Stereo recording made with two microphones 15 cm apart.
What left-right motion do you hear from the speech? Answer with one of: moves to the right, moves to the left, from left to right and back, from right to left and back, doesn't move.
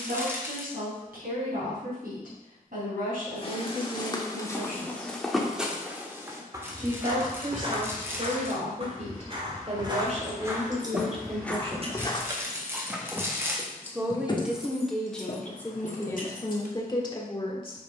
moves to the left.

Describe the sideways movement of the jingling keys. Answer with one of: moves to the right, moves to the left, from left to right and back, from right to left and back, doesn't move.
moves to the left.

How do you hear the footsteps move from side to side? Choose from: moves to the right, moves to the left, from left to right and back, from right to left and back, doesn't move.
from left to right and back.